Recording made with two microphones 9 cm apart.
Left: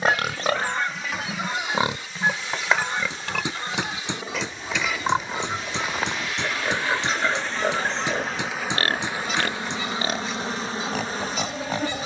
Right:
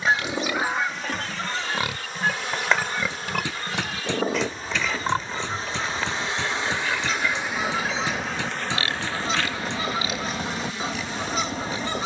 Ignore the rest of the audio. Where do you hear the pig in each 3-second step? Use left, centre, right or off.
left, centre, left, left.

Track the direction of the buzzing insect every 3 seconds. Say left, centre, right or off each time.
right, right, centre, left.